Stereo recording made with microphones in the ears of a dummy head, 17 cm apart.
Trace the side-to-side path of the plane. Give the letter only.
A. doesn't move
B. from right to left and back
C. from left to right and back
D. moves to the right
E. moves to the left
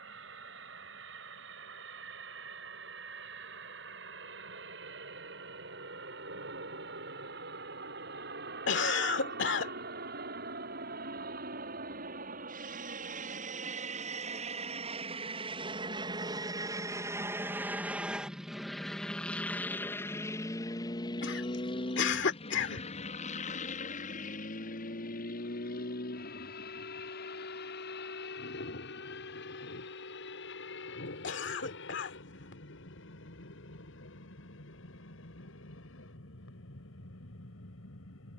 E.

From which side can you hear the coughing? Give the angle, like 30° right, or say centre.
70° left.